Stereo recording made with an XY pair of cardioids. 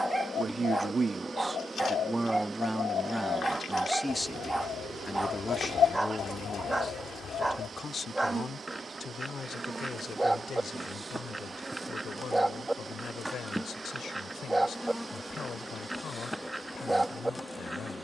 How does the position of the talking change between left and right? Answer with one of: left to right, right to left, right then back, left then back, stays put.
right to left.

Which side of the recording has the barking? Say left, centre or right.
centre.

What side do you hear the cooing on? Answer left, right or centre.
left.